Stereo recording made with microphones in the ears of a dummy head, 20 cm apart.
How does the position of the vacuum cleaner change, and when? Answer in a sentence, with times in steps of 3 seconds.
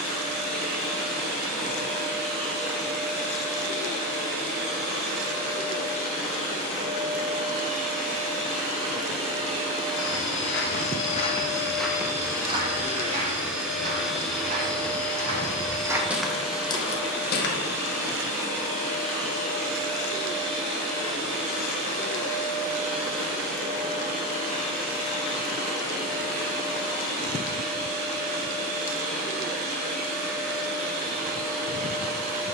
In this clip you hear the vacuum cleaner on the right from 0 s, in the centre from 12 s and on the right from 18 s.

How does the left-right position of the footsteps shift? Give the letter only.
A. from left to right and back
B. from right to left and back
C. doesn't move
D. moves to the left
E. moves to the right
A.